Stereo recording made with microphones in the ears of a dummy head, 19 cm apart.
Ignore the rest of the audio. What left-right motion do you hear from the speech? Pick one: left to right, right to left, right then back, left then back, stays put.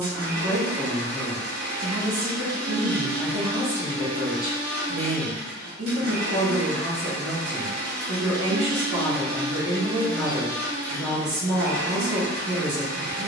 stays put.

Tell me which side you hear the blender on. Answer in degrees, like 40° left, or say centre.
50° right.